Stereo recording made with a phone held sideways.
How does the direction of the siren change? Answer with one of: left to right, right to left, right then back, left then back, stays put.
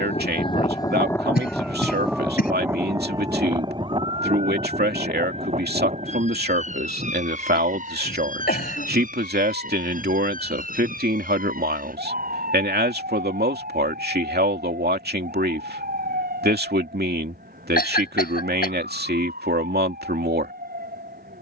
left to right.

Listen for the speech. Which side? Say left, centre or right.
right.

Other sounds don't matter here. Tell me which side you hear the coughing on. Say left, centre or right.
left.